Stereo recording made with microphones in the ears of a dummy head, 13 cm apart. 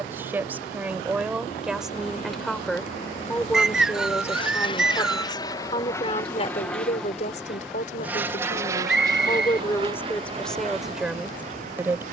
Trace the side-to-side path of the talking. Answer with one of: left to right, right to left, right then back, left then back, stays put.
left then back.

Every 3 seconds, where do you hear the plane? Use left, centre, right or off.
left, left, centre, right.